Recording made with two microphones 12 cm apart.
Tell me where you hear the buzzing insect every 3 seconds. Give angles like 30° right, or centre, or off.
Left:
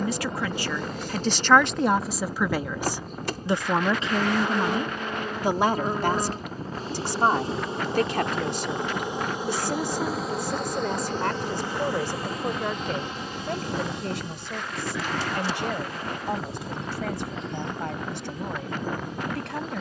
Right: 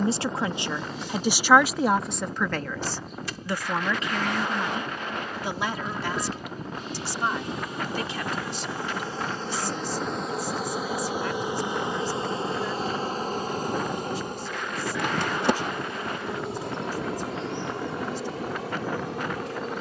50° left, 50° left, 30° left, centre, 40° right, 70° right, 80° right.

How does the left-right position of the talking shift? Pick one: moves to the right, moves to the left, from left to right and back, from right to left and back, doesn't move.
moves to the left.